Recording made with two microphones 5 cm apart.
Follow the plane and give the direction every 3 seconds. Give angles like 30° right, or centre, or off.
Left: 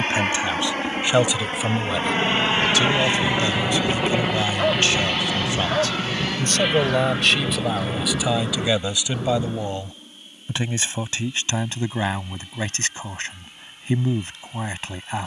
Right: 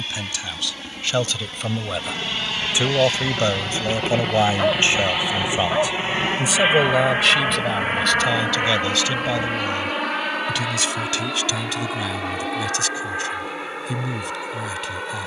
40° left, centre, 40° right, 60° right, 70° right.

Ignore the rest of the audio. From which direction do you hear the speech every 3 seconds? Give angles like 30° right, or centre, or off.
10° left, 30° right, centre, 20° left, 30° left.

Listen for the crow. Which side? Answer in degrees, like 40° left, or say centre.
70° left.